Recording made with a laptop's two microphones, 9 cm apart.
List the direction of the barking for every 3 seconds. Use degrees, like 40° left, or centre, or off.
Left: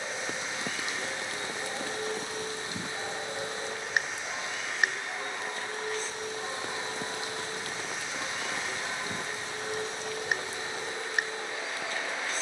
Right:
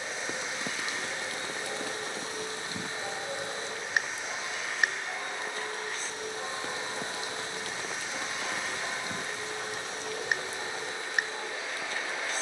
20° left, centre, 30° right, 50° right.